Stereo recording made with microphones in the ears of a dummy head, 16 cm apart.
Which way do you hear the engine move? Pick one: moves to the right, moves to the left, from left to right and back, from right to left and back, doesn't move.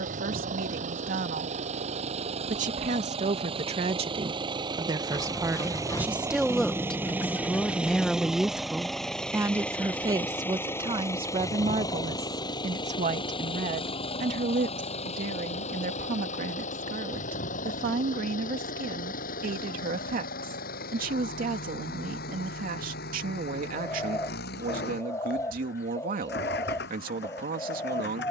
moves to the left.